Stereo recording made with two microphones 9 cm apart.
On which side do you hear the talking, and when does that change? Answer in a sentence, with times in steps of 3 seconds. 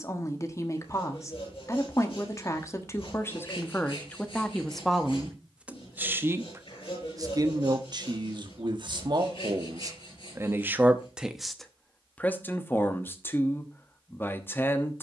In this clip you hear the talking on the left from 0 s, in the centre from 3 s, on the right from 6 s and on the left from 12 s.